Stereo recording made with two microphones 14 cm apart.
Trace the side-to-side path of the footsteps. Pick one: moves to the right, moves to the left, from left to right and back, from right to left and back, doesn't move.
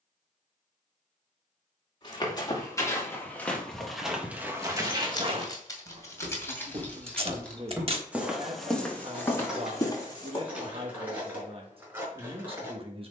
from left to right and back.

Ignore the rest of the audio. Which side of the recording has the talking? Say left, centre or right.
right.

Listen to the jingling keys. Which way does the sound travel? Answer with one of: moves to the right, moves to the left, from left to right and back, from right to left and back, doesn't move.
moves to the right.